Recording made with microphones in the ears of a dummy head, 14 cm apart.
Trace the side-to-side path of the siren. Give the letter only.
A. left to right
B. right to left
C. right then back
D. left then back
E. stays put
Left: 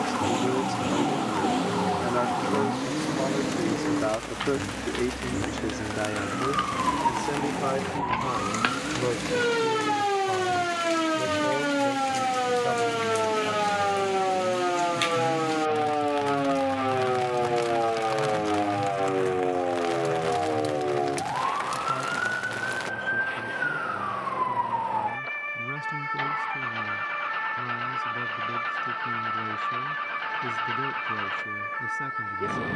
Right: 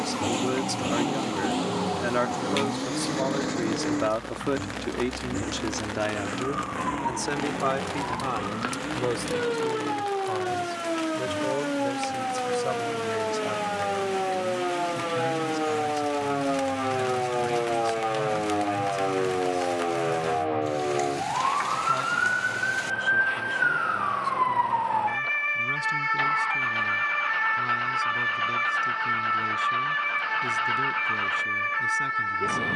A.